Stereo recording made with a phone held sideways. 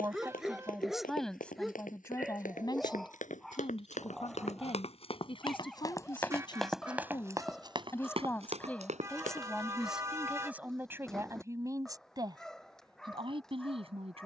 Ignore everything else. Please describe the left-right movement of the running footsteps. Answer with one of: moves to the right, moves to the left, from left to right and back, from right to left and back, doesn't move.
moves to the right.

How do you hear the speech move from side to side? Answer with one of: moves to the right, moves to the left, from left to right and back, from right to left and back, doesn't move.
from right to left and back.